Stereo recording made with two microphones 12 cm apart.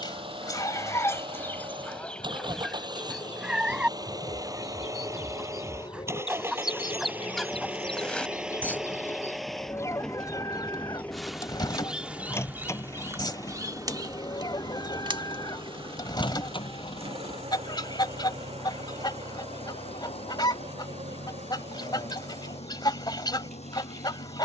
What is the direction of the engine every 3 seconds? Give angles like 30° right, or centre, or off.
40° right, 30° right, 10° right, 10° left, 30° left, 40° left, 50° left, 60° left.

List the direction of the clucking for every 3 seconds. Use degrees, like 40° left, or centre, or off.
20° left, 10° right, centre, 30° left, 40° left, 40° left, 40° left, 40° left.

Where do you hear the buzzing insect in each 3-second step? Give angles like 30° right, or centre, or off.
50° left, 50° left, 30° left, centre, 30° right, 50° right, 70° right, 70° right.